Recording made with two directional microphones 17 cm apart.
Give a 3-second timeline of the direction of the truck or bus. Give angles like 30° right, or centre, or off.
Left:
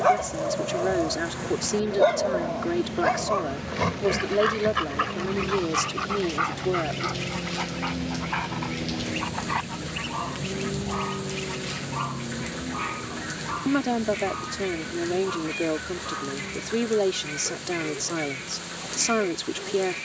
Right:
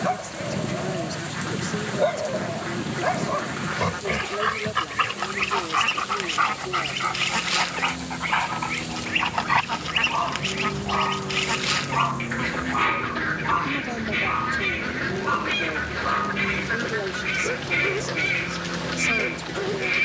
60° left, 40° left, 30° left, centre, 30° right, 50° right, 60° right.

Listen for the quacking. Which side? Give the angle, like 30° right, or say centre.
60° right.